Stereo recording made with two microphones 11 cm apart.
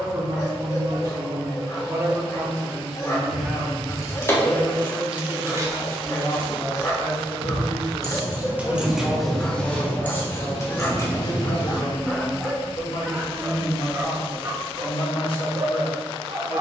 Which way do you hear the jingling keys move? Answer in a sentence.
You can hear the jingling keys go right and come back.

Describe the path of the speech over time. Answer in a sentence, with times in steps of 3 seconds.
You can hear the speech on the right from 0 s, in the centre from 3 s and on the left from 6 s.